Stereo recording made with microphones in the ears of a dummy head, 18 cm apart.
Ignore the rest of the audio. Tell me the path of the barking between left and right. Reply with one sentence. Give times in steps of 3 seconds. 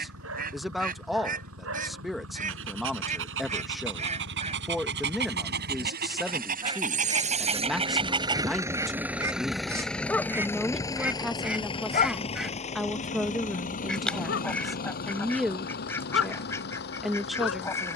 You can hear the barking on the right from 0 s, in the centre from 9 s and on the left from 12 s.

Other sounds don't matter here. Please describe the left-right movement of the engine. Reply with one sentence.
In this clip you hear the engine travel towards the left.